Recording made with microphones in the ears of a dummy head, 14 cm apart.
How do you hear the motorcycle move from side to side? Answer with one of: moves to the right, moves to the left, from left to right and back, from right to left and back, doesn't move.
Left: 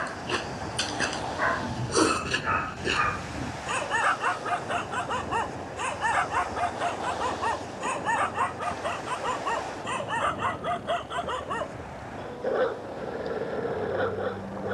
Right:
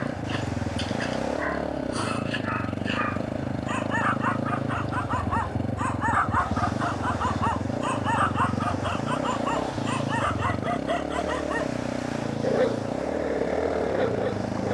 doesn't move.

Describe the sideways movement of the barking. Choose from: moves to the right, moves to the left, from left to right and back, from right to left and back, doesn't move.
moves to the right.